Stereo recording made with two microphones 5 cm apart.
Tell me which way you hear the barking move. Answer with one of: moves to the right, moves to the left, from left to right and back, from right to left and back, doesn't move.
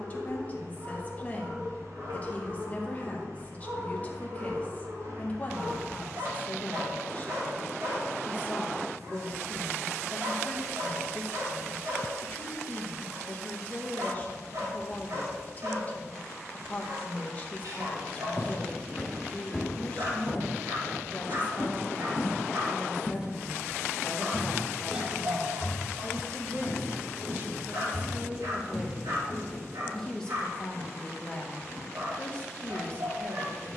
doesn't move.